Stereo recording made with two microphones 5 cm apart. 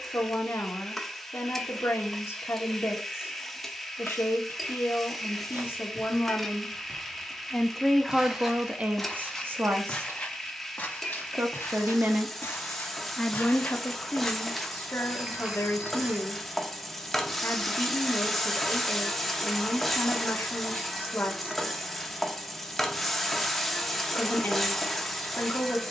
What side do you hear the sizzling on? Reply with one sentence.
You can hear the sizzling in the centre.